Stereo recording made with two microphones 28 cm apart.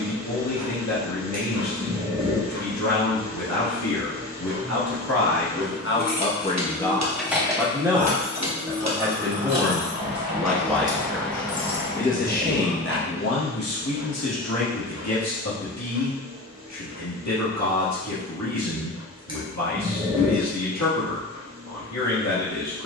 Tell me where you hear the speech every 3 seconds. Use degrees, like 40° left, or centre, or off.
80° left, 70° left, centre, centre, 60° left, 80° left, 80° left, 80° left.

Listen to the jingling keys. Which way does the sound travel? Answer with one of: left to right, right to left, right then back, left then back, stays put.
right then back.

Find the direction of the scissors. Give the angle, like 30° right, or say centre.
20° right.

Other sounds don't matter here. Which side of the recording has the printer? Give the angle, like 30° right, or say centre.
70° right.